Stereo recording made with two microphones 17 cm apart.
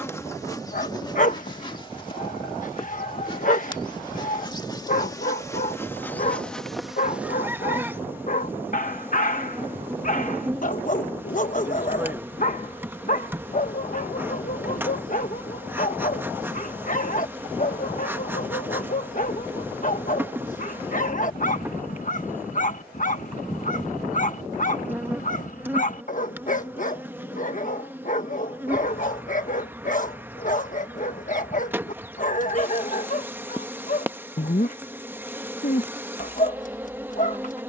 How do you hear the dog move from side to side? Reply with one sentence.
You can hear the dog stay in one place.